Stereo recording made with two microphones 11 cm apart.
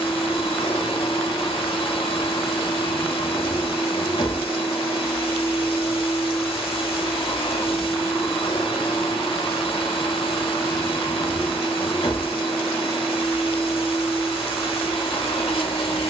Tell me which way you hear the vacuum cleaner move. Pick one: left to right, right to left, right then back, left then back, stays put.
stays put.